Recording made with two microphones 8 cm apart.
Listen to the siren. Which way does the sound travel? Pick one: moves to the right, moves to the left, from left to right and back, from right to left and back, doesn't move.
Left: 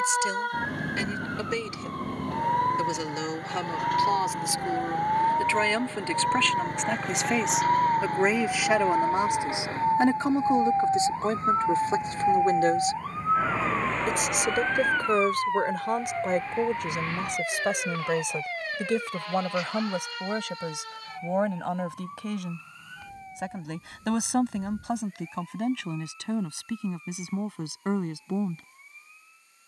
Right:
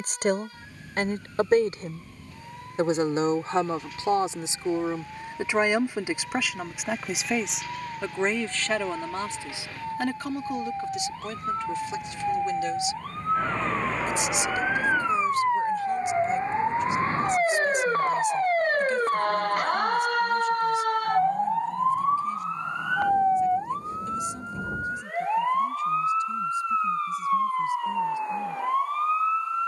moves to the right.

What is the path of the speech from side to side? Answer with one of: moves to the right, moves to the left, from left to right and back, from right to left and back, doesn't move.
moves to the left.